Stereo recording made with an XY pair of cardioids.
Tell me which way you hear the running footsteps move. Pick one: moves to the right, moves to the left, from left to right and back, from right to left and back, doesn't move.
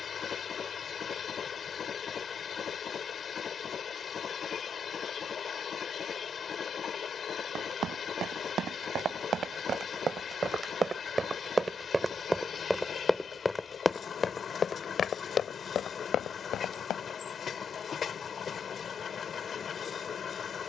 moves to the left.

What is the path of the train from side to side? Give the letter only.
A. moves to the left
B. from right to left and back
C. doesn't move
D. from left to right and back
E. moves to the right
C.